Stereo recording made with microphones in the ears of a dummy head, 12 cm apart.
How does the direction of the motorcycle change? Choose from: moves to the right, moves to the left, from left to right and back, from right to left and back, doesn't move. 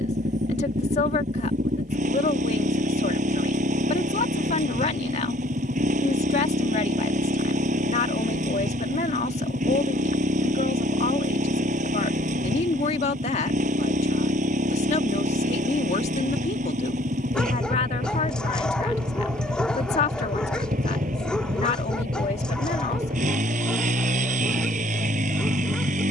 doesn't move.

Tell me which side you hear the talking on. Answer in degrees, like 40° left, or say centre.
60° left.